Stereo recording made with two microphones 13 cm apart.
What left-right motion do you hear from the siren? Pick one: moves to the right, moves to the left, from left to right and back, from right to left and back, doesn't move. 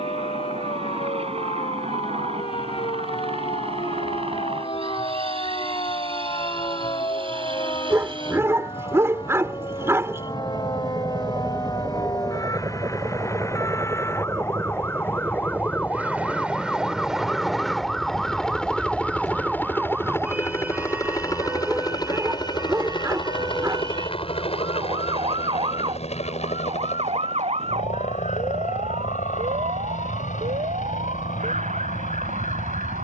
moves to the right.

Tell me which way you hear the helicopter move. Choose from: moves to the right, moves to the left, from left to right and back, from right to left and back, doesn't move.
moves to the left.